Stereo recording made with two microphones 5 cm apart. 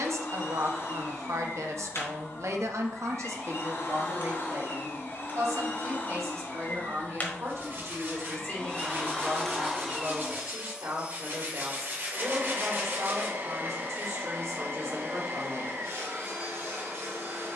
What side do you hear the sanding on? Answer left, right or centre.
right.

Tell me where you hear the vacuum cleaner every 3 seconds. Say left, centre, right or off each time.
left, left, left, centre, right, right.